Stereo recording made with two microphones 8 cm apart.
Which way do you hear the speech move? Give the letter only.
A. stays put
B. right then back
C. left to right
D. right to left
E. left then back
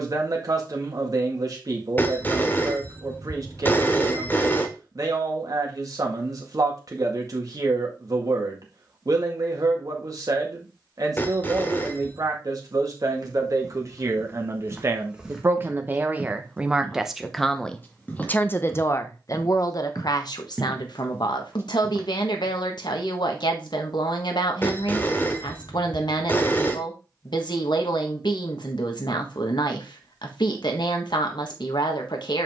D.